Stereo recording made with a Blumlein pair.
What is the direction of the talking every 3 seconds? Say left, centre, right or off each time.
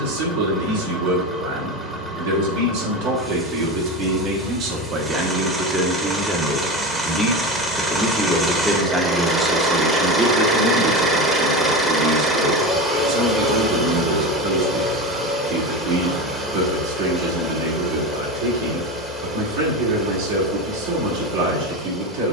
right, right, centre, right, right, right, right, right.